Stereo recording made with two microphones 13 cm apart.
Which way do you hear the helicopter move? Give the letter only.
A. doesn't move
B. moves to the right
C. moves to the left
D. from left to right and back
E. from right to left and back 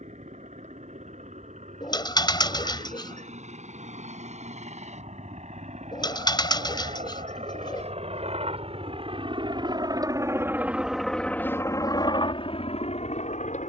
C.